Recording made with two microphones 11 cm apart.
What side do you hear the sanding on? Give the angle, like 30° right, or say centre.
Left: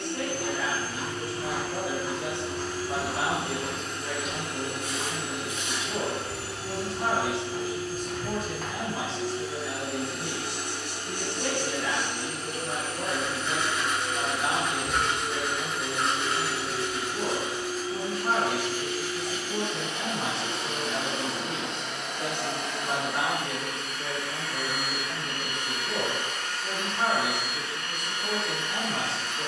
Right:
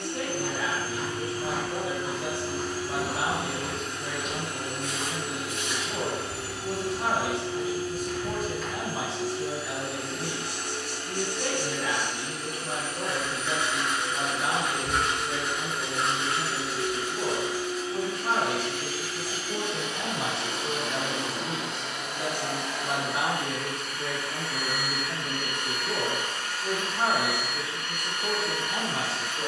centre.